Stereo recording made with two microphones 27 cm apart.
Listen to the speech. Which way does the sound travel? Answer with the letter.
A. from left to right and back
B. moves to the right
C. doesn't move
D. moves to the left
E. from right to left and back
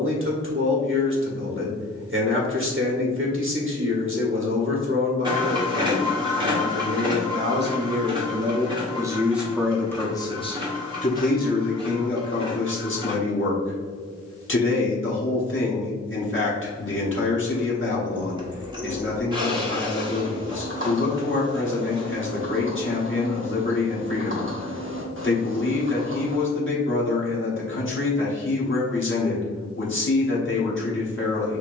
D.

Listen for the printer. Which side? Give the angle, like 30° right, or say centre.
20° right.